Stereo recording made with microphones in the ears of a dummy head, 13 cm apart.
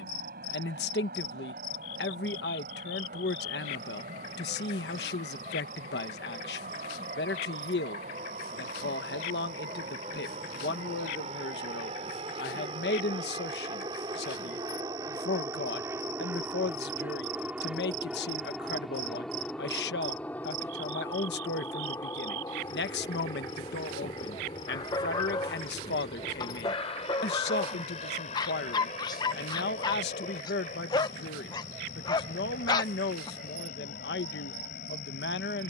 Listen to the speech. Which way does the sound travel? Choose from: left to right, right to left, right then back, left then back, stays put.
stays put.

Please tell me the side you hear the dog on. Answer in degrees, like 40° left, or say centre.
30° left.